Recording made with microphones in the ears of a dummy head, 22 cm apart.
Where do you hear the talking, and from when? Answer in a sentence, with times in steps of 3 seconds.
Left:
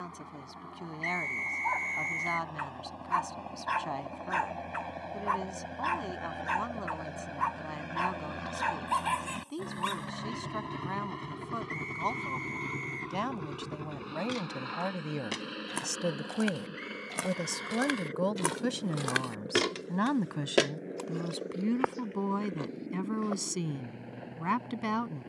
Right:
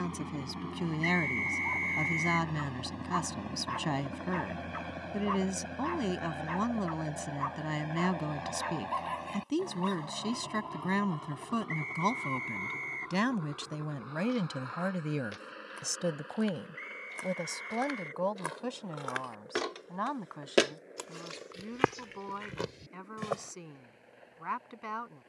In this clip you hear the talking on the right from 0 s, in the centre from 15 s and on the left from 18 s.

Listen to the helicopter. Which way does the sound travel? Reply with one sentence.
In this clip you hear the helicopter travel towards the left.